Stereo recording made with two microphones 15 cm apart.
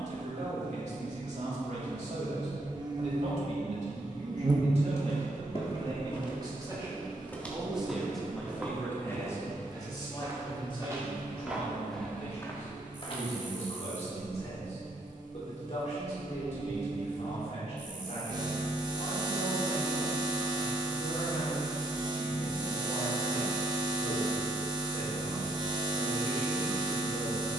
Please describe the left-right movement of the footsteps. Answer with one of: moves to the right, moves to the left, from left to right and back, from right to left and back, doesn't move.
from left to right and back.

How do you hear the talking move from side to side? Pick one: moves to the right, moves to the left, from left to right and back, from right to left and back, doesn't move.
moves to the left.